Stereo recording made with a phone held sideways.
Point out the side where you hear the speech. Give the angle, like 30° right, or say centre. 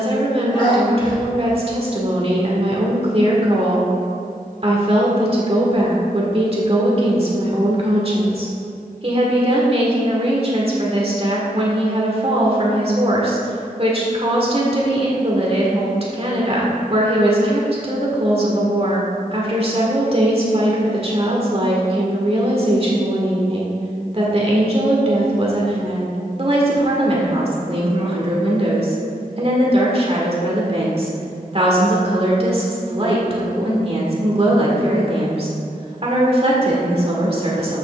40° right.